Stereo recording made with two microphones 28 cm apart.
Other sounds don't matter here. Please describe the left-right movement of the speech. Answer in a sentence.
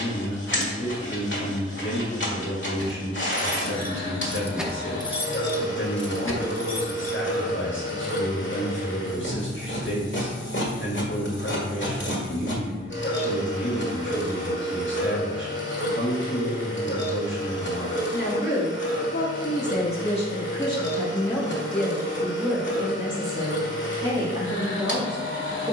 You can hear the speech move to the right.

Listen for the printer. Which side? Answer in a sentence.
You can hear the printer on the left.